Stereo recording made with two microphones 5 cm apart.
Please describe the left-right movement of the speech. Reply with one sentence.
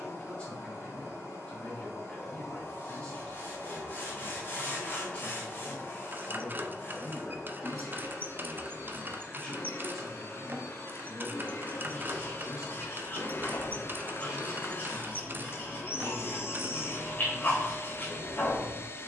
You can hear the speech move to the right.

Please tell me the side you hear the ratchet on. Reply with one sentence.
You can hear the ratchet on the right.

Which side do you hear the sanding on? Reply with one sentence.
You can hear the sanding on the left.